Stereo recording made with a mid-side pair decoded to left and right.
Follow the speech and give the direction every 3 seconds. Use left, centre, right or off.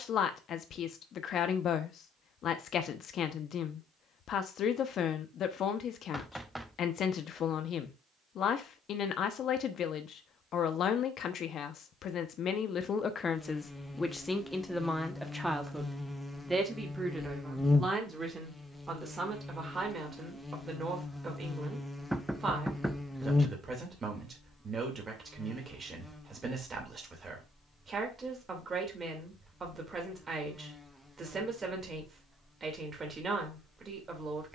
left, left, left, left, left, centre, right, right, right, right, right, right.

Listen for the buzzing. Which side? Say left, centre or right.
centre.